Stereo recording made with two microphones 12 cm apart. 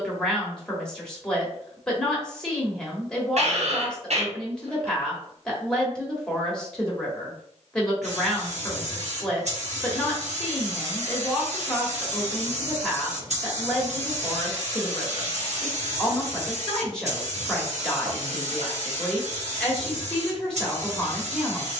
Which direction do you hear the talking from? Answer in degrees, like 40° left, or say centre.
10° left.